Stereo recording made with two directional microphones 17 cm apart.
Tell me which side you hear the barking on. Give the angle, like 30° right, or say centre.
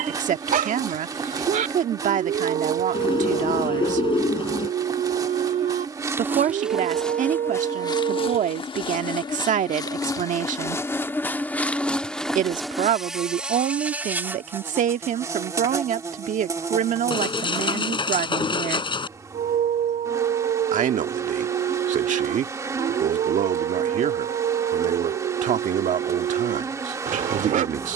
50° right.